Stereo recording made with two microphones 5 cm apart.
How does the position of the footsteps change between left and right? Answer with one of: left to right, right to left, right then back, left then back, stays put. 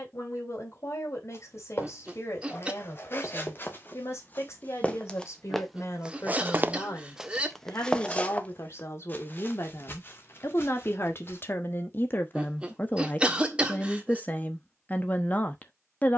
right then back.